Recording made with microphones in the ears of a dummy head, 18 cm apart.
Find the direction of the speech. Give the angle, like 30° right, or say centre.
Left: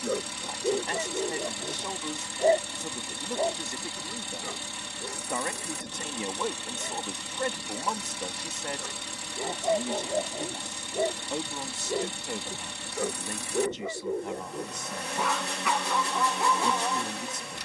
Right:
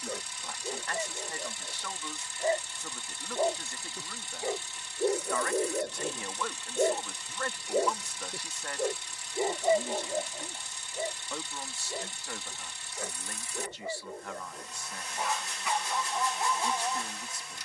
20° left.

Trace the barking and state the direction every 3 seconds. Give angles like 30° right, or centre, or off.
50° left, 30° right, 40° right, 20° left, 60° left, 60° left.